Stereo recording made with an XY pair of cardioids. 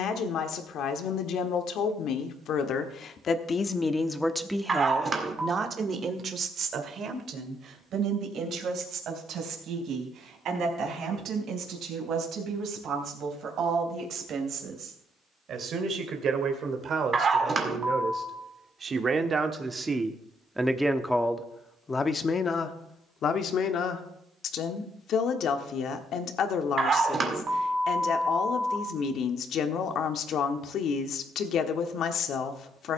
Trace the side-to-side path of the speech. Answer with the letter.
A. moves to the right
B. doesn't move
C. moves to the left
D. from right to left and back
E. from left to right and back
E.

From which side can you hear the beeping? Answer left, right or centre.
right.